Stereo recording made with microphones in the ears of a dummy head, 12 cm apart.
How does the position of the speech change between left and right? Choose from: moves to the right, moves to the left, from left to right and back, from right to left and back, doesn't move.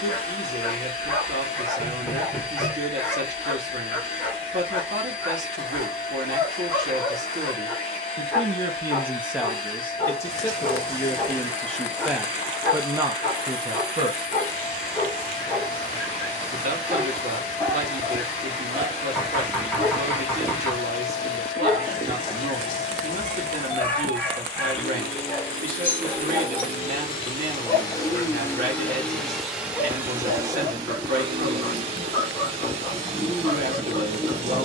from right to left and back.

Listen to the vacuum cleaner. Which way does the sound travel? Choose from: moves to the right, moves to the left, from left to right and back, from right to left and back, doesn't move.
moves to the right.